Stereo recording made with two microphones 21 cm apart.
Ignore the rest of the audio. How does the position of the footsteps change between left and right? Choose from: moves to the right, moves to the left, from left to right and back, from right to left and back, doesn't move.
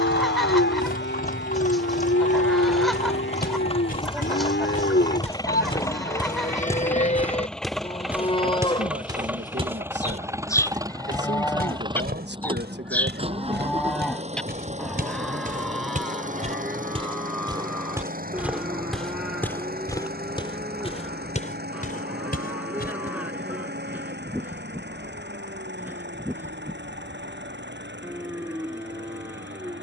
from left to right and back.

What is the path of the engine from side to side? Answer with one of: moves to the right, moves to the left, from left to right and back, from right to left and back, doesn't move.
moves to the right.